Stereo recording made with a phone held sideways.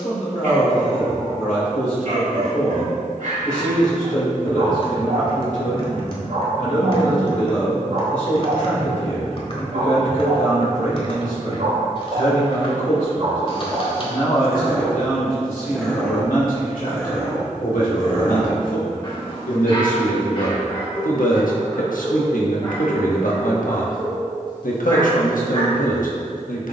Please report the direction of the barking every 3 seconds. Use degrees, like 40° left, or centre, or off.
70° right, 70° right, 70° right, 60° right, 30° right, 10° left, 30° left, 30° left, 30° left.